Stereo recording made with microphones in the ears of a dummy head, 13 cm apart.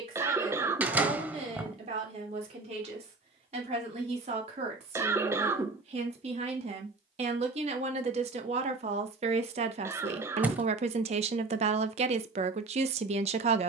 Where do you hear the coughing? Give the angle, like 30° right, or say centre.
20° right.